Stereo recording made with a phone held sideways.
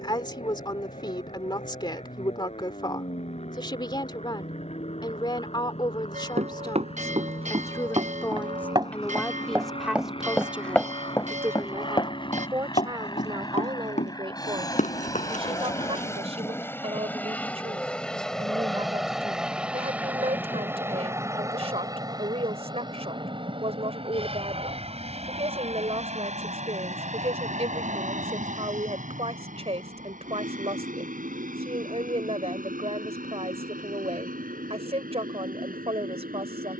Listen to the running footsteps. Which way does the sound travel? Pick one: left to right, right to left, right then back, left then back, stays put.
right to left.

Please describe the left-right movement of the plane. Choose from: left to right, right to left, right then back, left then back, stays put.
left to right.